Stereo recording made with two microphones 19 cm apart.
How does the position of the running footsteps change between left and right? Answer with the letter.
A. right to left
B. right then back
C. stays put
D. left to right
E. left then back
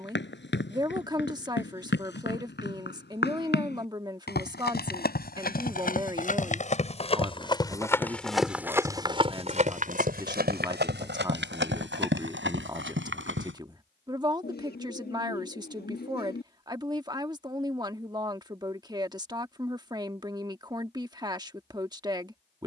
D.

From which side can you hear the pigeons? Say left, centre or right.
left.